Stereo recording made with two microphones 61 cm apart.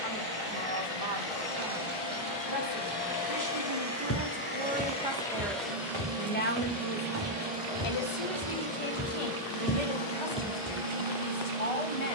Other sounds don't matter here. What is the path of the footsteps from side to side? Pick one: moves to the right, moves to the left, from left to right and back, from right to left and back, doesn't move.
from left to right and back.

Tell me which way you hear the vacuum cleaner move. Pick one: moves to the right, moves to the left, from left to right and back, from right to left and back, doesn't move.
from left to right and back.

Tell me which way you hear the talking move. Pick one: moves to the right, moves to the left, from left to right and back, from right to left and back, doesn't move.
moves to the left.